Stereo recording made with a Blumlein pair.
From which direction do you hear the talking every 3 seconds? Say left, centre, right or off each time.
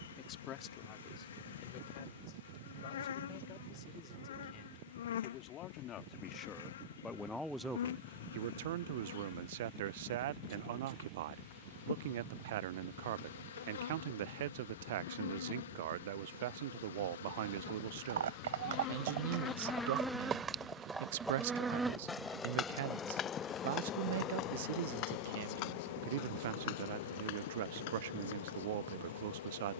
left, left, centre, right, right, right, right, right, right, right.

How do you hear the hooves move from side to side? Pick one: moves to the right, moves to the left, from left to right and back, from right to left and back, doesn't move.
moves to the left.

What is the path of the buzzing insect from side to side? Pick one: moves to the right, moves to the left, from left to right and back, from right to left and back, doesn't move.
from left to right and back.